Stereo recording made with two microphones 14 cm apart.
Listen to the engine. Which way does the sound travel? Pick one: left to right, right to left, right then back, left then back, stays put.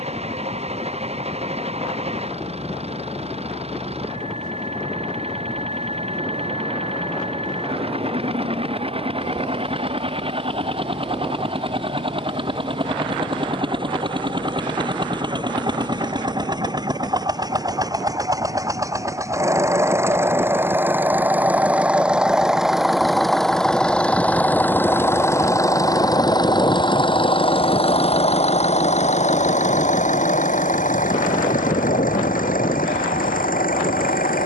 right to left.